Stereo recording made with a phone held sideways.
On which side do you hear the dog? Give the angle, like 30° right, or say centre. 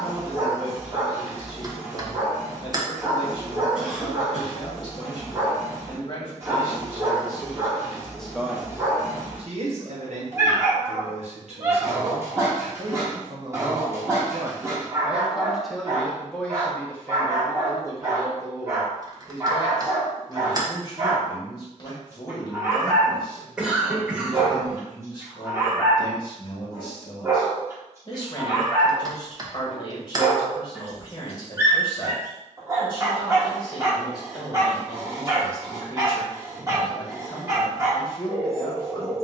20° right.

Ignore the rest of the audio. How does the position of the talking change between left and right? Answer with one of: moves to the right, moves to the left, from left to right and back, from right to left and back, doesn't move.
from left to right and back.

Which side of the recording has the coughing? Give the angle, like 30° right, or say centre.
10° right.